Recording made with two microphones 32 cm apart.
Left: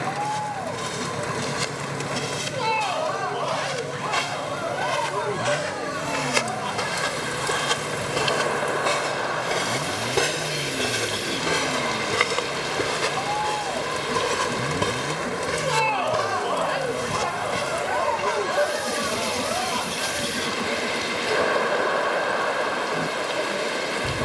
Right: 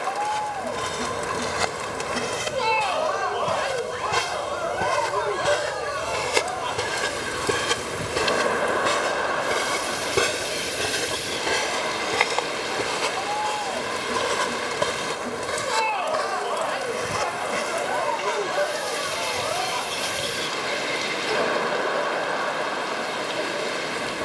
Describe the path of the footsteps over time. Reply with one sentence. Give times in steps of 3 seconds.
You can hear the footsteps on the right from 0 s, in the centre from 9 s, on the left from 12 s and not at all from 21 s.